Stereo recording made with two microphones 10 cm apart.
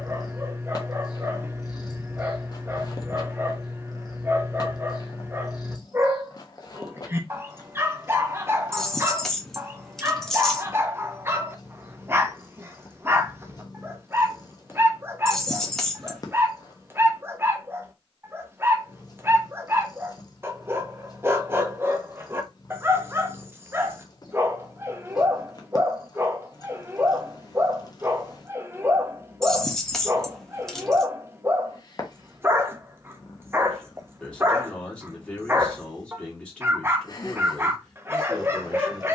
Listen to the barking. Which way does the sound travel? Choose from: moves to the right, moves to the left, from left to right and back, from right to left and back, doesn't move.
doesn't move.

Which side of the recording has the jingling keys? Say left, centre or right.
centre.